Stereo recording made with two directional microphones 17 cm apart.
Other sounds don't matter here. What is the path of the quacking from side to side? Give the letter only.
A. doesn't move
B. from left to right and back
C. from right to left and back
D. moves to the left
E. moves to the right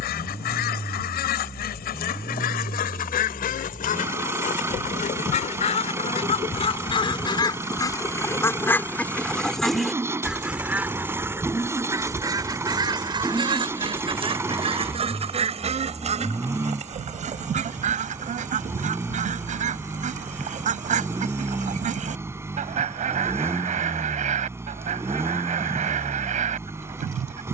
E.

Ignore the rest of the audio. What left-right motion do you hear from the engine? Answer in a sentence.
You can hear the engine stay put.